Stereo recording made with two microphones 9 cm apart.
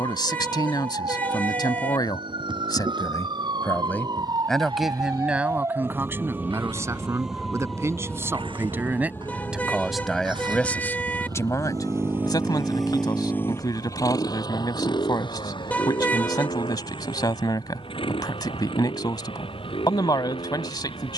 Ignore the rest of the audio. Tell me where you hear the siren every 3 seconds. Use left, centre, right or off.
right, right, centre, left, left, left, left.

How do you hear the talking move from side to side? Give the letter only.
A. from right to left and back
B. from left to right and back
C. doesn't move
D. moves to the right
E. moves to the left
B.